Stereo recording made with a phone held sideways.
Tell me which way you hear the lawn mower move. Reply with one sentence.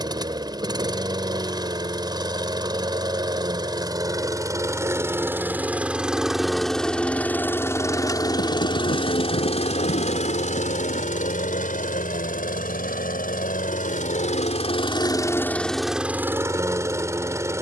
You can hear the lawn mower go left and come back.